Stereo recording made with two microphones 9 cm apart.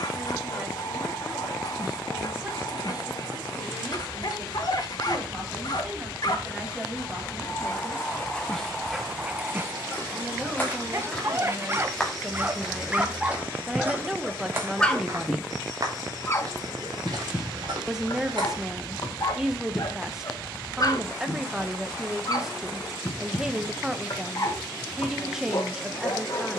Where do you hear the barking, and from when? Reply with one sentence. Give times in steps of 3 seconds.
In this clip you hear the barking on the left from 0 s, on the right from 9 s, in the centre from 12 s and on the left from 15 s.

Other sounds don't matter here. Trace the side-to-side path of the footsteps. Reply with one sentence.
In this clip you hear the footsteps move from left to right.